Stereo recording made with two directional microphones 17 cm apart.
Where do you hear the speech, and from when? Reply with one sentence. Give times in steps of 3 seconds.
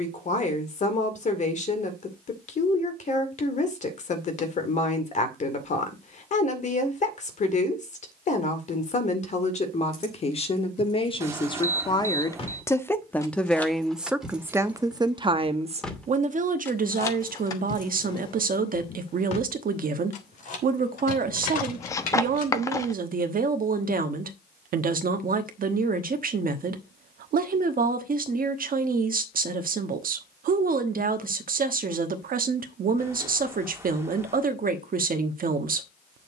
You can hear the speech on the left from 0 s, in the centre from 12 s and on the right from 15 s.